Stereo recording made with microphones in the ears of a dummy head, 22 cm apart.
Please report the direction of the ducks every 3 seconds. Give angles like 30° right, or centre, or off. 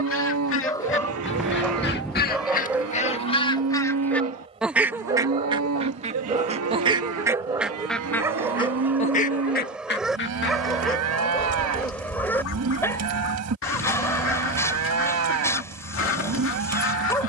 50° left, centre, 10° right, 50° left, 60° left, 60° left.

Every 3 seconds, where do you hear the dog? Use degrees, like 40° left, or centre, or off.
centre, 20° right, 10° right, centre, 10° left, 10° left.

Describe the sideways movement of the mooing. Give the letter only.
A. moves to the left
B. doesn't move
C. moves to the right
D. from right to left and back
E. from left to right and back
B.